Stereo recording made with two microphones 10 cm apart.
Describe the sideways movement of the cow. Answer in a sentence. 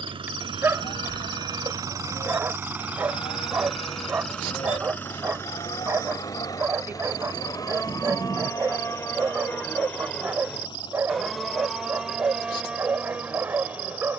You can hear the cow move from left to right.